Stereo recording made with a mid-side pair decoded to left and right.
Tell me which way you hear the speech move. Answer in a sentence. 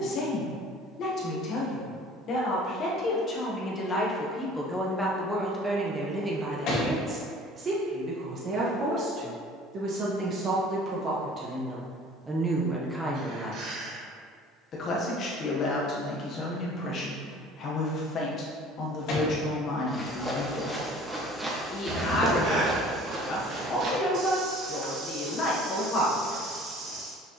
You can hear the speech go right and come back.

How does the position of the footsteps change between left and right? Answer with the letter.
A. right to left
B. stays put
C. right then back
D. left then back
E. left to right
E.